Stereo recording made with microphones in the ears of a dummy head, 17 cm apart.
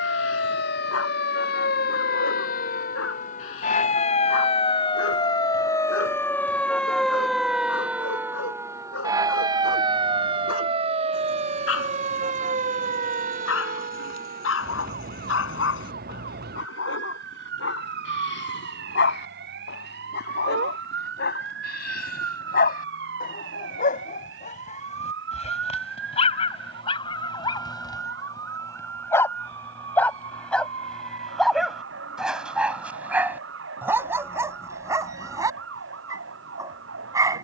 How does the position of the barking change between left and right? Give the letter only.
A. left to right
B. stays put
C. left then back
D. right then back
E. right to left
A.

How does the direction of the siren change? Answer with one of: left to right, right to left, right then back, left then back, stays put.
left to right.